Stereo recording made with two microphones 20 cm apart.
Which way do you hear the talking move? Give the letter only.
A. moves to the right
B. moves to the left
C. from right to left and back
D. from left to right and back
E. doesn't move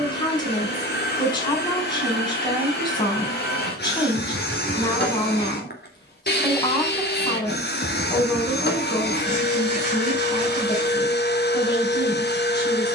E.